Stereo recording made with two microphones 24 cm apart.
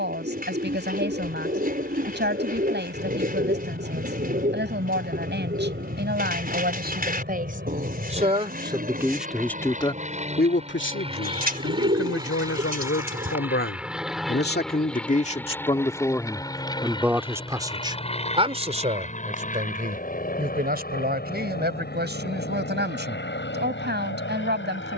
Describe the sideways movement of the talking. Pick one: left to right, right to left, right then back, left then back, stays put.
left then back.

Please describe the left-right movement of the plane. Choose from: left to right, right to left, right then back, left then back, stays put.
right to left.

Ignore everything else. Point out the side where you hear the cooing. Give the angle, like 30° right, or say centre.
40° right.